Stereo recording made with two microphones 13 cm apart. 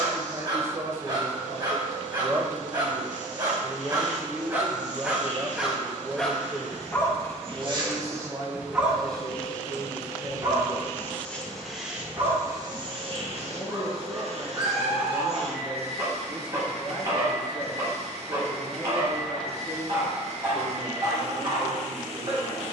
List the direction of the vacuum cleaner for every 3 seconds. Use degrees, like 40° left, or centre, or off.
60° right, 60° right, 40° right, 10° left, 40° right, 50° right, 50° right, 50° right.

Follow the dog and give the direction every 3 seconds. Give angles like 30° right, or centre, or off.
40° right, 20° right, centre, 30° right, 30° right, 30° right, 30° right, 30° right.